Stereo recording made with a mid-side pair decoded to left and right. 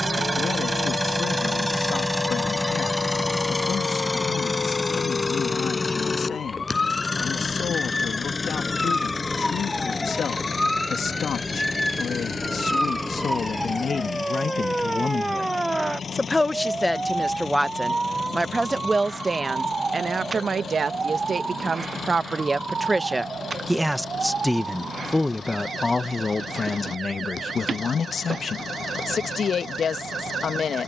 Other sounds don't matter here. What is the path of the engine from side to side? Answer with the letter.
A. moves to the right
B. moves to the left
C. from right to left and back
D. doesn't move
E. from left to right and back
B.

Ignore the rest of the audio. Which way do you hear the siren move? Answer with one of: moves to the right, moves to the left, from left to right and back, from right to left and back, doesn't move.
moves to the right.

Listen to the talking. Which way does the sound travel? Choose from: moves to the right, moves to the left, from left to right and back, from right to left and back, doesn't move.
from left to right and back.